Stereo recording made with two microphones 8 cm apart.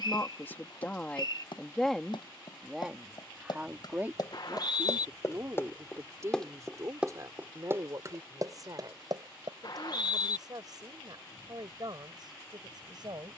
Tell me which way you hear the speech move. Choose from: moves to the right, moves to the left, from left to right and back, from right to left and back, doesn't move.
moves to the right.